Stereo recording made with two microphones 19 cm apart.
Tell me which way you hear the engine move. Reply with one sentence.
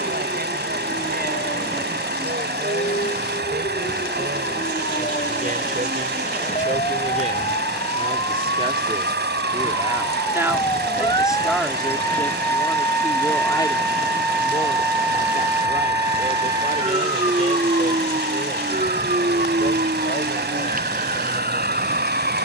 You can hear the engine stay put.